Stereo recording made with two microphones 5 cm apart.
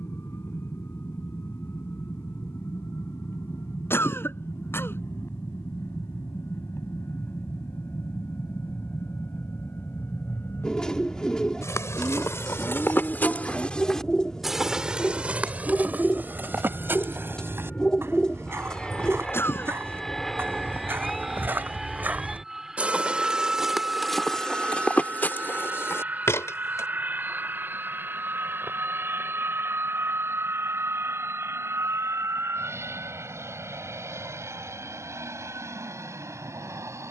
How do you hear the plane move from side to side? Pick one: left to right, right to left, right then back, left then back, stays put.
left to right.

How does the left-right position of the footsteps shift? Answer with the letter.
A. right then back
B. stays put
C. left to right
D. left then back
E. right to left
A.